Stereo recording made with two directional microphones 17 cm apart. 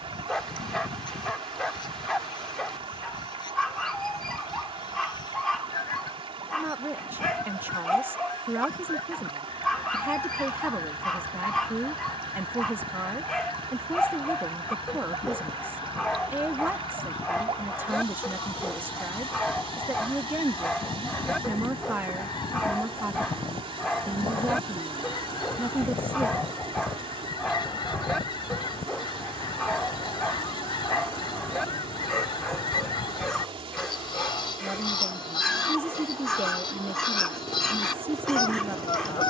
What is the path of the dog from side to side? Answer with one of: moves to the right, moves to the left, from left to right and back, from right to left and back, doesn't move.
doesn't move.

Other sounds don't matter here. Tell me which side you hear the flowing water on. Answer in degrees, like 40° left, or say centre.
30° right.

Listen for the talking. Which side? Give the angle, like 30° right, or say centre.
10° right.